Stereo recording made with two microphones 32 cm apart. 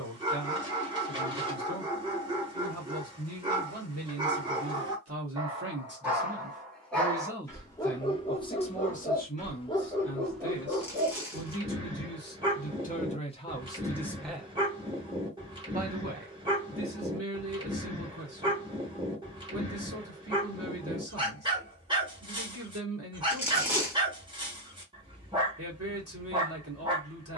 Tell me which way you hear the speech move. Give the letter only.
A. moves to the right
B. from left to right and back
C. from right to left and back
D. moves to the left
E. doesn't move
C.